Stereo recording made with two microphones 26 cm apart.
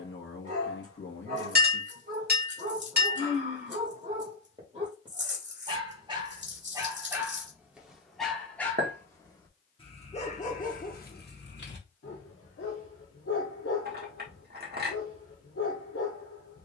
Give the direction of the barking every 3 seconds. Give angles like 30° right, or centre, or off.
30° right, 30° right, 10° right, 30° left, 60° left, 60° left.